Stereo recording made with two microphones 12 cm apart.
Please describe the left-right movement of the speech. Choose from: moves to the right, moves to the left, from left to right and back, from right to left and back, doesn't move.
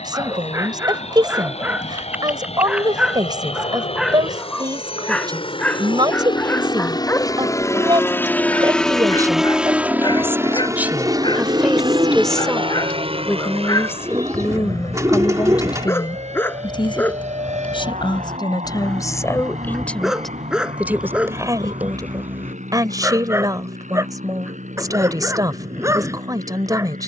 from right to left and back.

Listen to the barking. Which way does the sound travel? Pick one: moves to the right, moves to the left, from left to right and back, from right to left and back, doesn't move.
from right to left and back.